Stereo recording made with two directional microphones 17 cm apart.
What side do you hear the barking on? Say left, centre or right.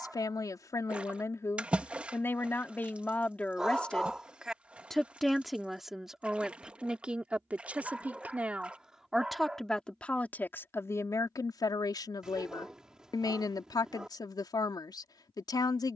centre.